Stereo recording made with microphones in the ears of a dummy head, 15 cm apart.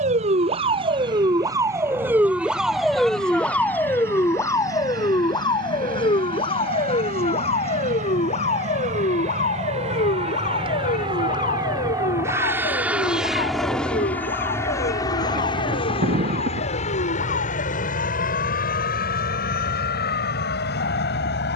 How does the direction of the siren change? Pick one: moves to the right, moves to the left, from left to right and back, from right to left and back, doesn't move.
moves to the left.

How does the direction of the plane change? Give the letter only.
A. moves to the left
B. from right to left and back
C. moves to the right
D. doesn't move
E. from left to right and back
A.